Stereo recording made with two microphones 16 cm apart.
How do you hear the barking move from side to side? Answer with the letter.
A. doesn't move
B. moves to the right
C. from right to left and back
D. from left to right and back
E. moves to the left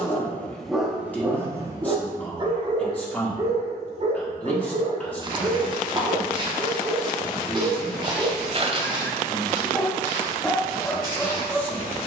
D.